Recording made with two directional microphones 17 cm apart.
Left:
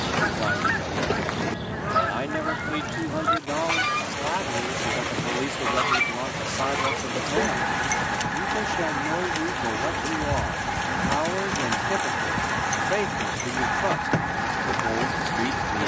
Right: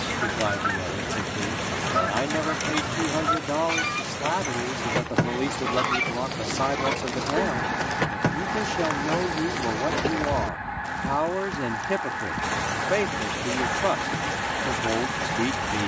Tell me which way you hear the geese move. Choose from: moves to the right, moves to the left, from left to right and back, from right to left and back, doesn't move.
doesn't move.